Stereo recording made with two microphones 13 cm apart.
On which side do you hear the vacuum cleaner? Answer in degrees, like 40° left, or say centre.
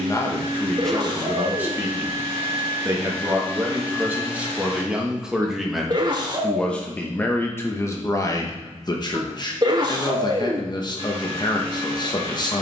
50° right.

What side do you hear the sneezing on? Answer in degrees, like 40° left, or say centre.
40° right.